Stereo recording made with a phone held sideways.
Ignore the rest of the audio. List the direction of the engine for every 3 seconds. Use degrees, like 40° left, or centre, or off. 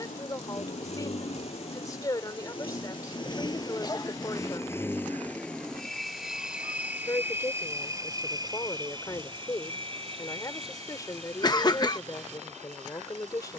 50° left, 20° left, 20° right, 40° right, 60° right.